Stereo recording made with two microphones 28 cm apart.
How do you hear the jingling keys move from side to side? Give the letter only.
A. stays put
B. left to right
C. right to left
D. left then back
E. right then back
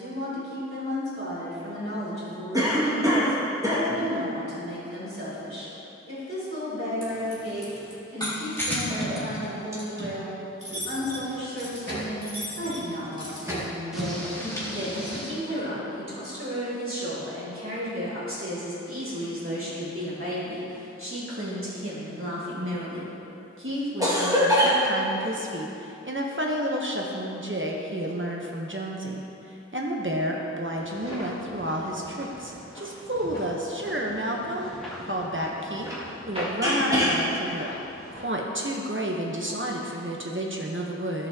E.